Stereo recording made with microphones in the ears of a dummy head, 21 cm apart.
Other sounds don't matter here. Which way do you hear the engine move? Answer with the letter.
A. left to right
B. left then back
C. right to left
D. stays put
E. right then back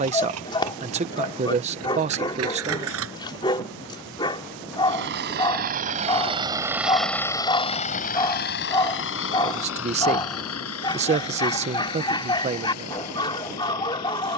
C.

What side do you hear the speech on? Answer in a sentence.
You can hear the speech on the right.